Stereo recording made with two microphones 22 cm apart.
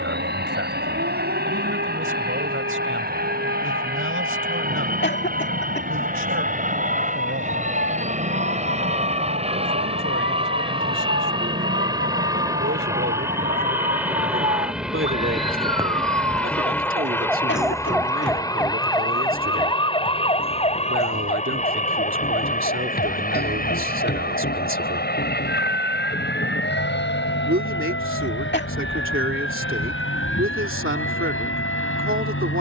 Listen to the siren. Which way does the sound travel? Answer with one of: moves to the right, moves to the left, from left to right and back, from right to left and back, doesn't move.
moves to the left.